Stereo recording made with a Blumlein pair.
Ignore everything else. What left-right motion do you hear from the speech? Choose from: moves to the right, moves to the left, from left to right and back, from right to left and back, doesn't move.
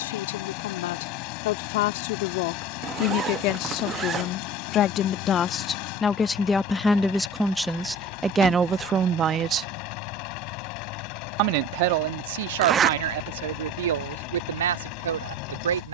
moves to the right.